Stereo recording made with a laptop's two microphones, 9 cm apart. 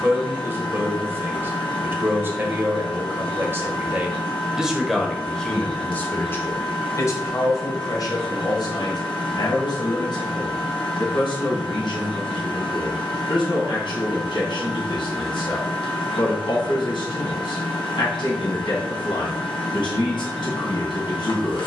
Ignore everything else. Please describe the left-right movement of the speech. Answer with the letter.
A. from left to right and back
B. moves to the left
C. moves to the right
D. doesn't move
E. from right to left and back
B.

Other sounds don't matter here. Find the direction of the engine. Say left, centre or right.
left.